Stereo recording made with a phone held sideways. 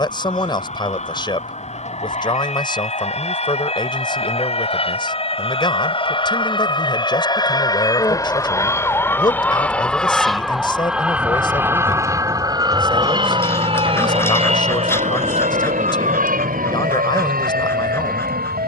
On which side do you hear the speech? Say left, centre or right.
left.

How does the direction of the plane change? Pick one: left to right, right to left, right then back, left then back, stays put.
left to right.